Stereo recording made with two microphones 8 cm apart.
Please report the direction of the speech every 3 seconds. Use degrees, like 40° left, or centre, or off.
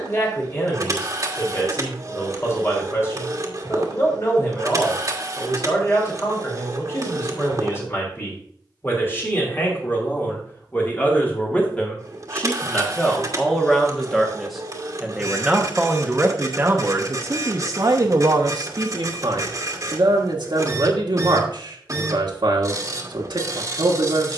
40° left, 40° left, 30° left, 30° left, 10° left, 30° right, 60° right, 70° right.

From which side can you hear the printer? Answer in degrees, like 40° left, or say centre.
40° right.